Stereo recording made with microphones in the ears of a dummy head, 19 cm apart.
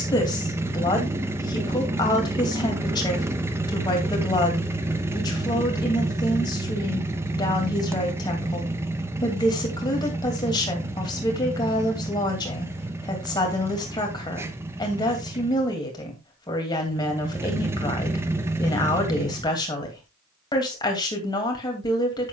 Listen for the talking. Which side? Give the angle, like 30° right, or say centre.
20° left.